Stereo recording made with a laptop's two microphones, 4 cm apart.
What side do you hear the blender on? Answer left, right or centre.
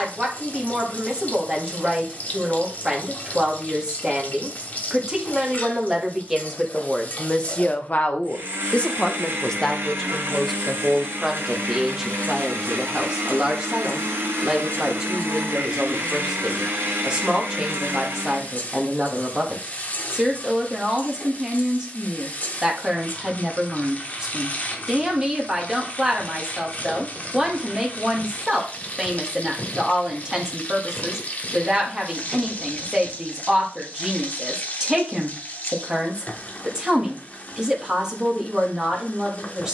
right.